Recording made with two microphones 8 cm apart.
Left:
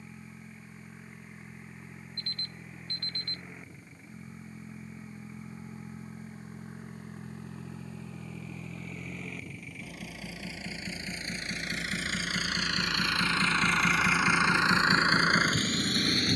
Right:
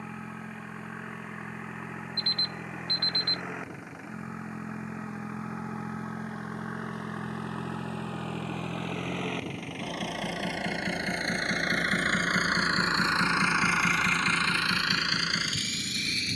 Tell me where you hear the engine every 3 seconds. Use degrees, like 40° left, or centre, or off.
80° right, 80° right, 80° right, 60° right, 10° right, 40° left.